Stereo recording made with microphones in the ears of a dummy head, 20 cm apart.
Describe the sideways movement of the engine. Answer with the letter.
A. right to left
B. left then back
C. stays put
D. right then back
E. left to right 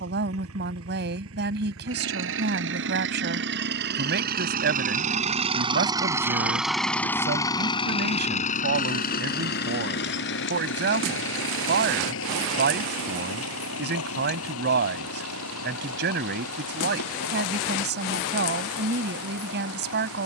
A.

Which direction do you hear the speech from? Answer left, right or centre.
right.